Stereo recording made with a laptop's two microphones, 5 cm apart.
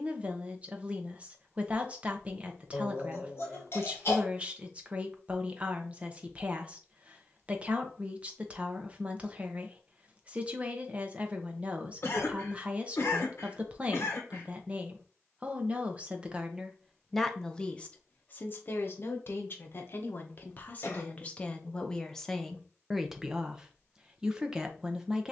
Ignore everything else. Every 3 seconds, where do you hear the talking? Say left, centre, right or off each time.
right, right, right, right, right, centre, left, centre, centre.